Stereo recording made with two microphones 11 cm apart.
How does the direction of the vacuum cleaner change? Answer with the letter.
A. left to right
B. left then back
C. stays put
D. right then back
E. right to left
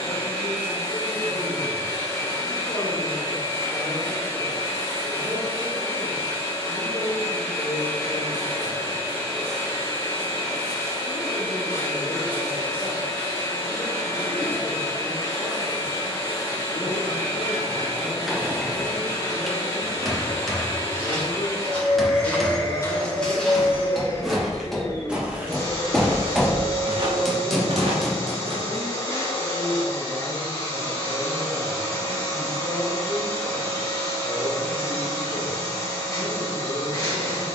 C.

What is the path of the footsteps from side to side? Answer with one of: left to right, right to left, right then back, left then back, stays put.
left to right.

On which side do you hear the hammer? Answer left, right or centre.
centre.